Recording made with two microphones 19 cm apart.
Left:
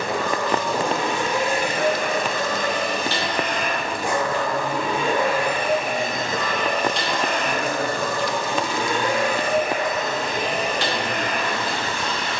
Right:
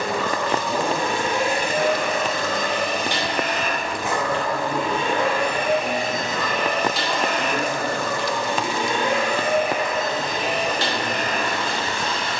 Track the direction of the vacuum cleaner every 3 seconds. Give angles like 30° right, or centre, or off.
40° right, centre, 10° right, 40° right.